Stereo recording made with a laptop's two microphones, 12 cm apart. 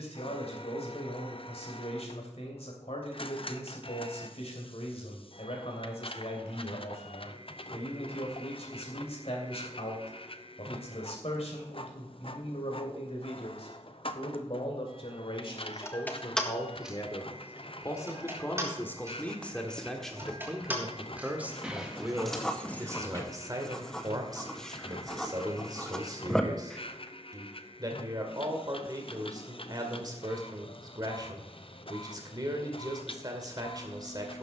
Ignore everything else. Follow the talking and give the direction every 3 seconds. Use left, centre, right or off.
left, left, left, left, left, left, centre, right, right, right, right, right.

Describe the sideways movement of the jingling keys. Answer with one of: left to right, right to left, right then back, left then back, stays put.
right then back.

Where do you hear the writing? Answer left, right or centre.
centre.